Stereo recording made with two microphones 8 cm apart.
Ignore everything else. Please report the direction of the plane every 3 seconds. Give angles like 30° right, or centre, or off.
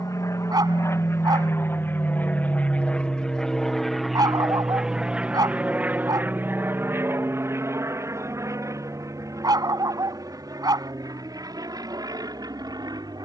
30° left, centre, 30° right, 50° right, 50° right.